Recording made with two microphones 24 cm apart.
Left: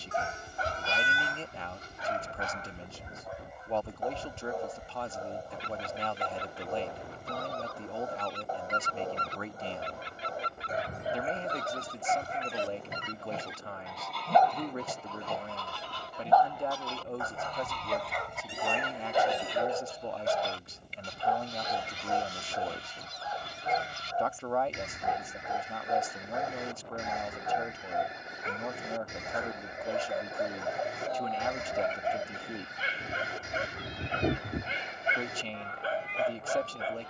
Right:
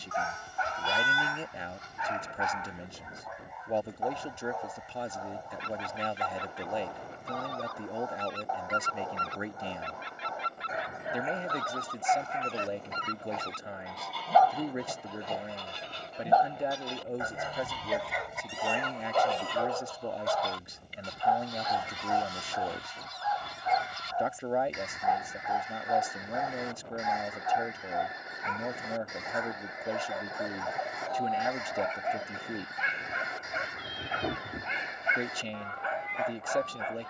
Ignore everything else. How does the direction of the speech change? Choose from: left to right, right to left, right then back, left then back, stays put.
stays put.